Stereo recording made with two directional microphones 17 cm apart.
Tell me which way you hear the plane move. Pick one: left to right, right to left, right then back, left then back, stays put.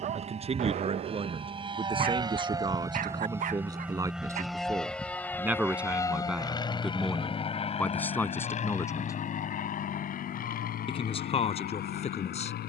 right to left.